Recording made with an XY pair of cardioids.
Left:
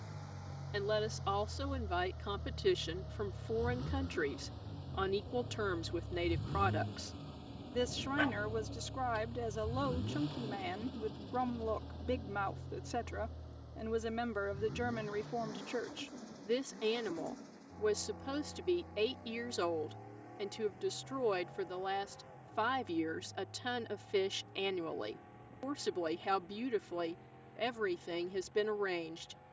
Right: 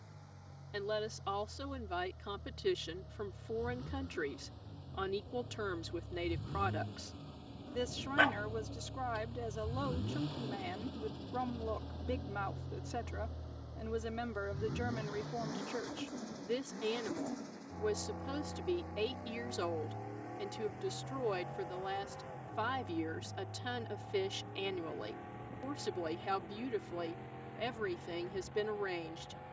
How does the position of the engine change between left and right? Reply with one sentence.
You can hear the engine move from left to right.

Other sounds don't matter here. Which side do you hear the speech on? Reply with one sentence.
In this clip you hear the speech on the left.